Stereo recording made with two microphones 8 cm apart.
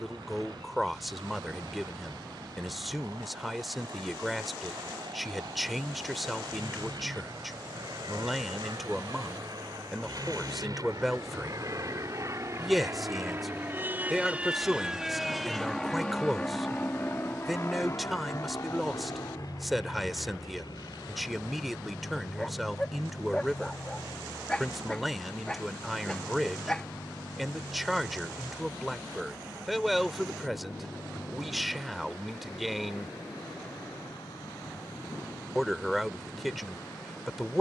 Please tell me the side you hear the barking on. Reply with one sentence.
In this clip you hear the barking in the centre.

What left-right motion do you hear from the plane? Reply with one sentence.
You can hear the plane move to the left.